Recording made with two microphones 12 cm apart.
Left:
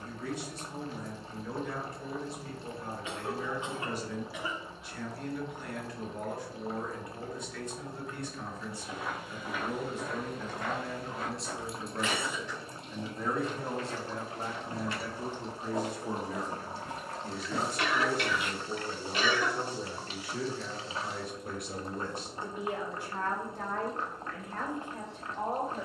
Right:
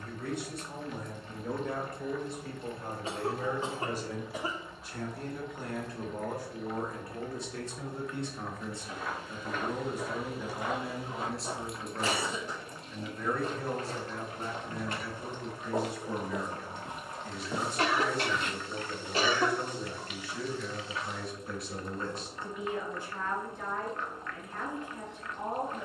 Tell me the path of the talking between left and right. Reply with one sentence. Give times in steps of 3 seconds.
In this clip you hear the talking on the right from 0 s, in the centre from 9 s and on the left from 12 s.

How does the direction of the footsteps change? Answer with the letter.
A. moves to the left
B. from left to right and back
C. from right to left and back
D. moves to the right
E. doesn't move
B.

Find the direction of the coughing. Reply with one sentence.
In this clip you hear the coughing on the right.